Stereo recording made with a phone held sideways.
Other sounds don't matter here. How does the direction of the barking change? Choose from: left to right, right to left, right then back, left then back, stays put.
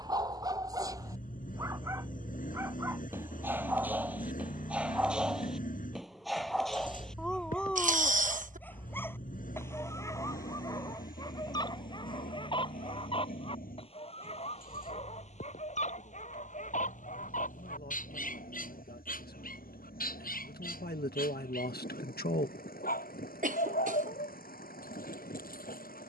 right to left.